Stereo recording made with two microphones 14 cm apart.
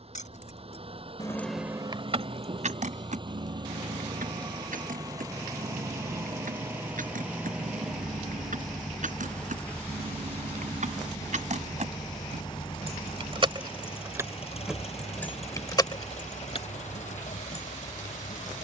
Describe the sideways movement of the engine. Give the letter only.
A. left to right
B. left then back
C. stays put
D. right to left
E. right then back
D.